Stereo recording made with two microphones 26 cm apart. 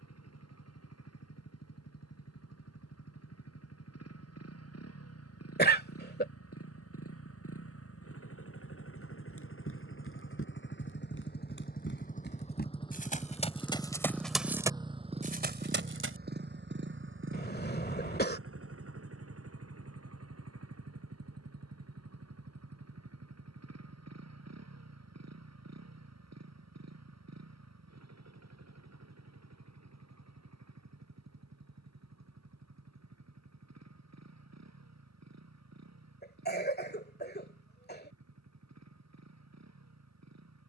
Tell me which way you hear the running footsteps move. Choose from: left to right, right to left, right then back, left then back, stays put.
left to right.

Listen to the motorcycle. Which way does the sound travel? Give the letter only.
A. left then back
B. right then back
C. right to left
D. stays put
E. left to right
E.